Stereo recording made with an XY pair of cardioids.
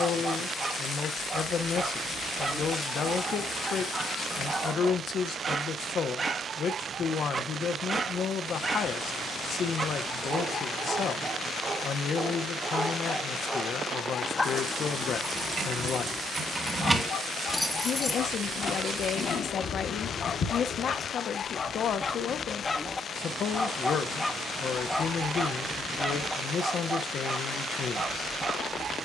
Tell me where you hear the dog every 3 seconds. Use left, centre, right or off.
right, right, right, right, centre, left, left, left, centre, right.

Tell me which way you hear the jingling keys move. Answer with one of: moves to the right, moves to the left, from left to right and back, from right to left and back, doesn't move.
moves to the left.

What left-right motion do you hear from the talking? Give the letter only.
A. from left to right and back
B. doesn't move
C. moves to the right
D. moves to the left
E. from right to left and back
B.